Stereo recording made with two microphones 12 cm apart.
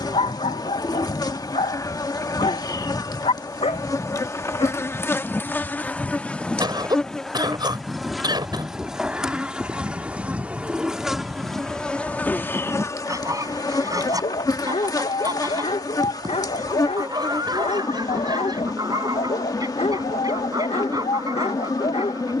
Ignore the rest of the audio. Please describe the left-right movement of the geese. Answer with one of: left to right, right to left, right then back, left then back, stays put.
left to right.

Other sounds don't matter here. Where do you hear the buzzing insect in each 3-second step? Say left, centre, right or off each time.
left, left, centre, centre, left, left, left, left.